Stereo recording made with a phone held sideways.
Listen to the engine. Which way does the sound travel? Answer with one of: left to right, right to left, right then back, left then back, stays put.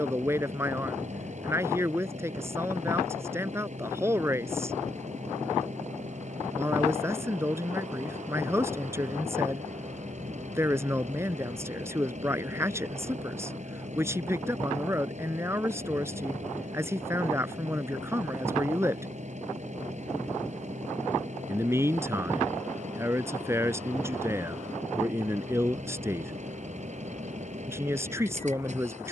stays put.